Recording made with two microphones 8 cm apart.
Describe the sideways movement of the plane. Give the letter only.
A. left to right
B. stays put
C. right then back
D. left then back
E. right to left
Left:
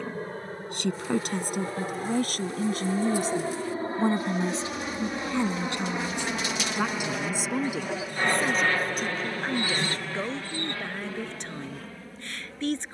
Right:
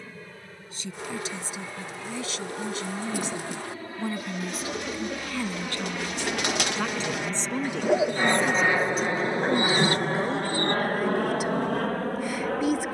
A.